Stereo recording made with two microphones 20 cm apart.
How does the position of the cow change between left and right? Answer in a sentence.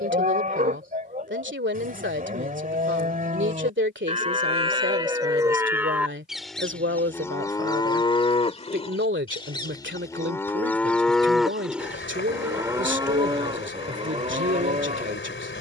You can hear the cow go left and come back.